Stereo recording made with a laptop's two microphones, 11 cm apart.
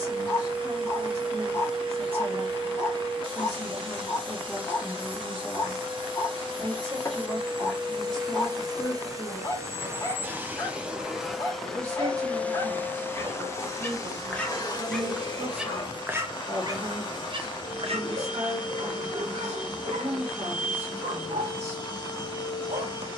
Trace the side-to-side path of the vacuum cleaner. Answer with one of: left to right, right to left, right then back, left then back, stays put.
right to left.